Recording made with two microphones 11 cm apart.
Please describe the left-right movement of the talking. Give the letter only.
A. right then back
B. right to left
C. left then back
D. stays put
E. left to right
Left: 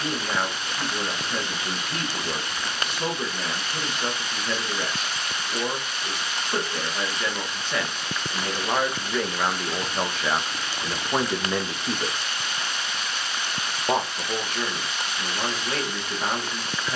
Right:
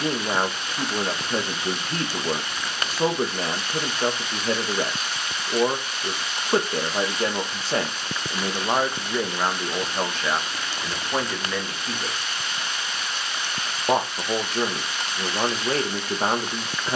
C.